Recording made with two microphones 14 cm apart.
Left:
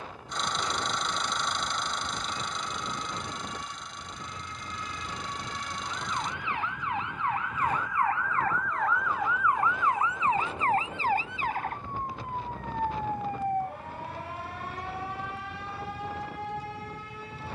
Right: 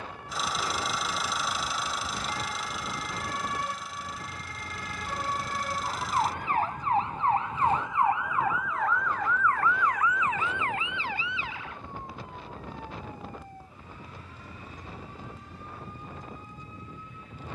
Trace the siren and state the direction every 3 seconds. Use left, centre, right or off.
right, right, right, left, left, left.